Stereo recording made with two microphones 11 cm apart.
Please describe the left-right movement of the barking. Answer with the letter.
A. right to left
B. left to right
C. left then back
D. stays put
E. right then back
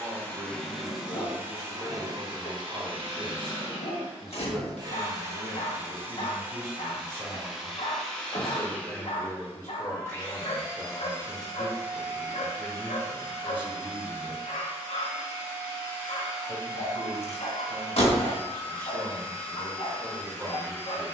D.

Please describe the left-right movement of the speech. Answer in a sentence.
In this clip you hear the speech go left and come back.